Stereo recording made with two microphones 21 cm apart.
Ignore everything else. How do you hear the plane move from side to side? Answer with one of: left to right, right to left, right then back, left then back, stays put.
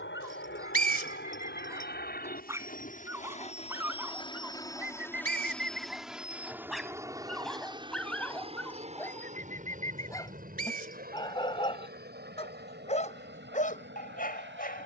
left to right.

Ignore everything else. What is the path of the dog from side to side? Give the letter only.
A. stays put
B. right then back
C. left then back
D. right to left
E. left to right
D.